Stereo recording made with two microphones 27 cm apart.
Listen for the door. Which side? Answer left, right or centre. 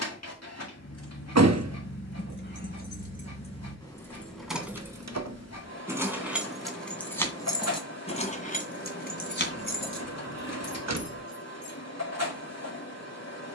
right.